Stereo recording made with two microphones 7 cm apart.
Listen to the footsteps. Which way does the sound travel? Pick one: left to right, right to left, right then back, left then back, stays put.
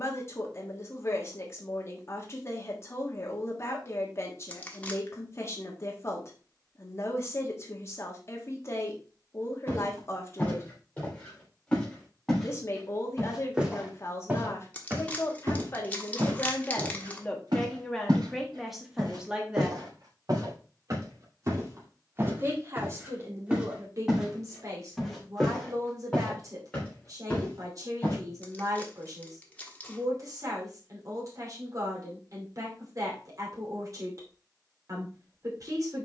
right then back.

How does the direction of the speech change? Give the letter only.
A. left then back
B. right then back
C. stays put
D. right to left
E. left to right
E.